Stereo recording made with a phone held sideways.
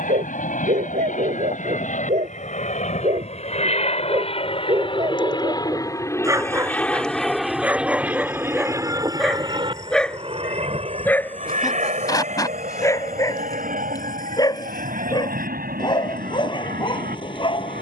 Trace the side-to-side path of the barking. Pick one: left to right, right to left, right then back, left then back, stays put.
right to left.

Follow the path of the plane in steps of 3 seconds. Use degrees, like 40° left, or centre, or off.
60° left, 40° left, centre, 40° right, 50° right, 60° right.